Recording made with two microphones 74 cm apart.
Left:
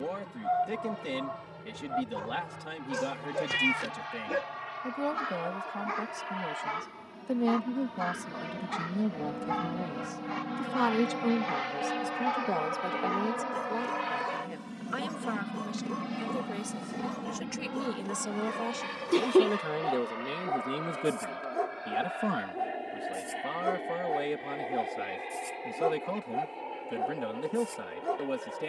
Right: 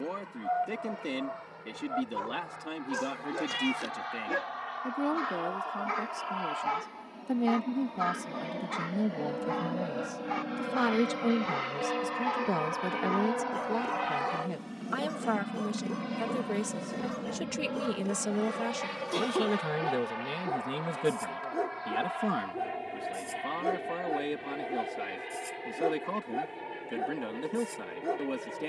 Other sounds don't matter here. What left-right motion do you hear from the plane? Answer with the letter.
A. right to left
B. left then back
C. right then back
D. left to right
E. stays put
D.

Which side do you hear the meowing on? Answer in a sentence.
In this clip you hear the meowing on the left.